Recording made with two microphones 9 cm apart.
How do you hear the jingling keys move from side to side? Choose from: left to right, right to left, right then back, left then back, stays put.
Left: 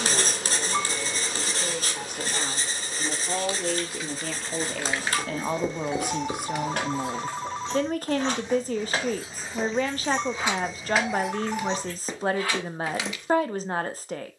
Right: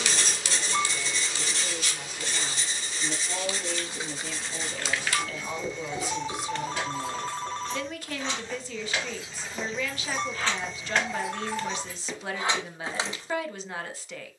left then back.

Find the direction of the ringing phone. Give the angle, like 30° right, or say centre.
10° left.